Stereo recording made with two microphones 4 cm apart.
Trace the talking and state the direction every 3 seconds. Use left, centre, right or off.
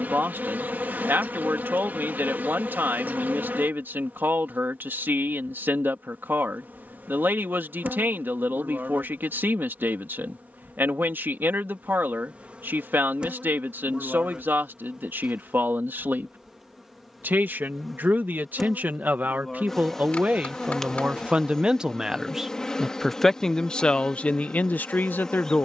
right, right, right, right, right, right, right, centre, left.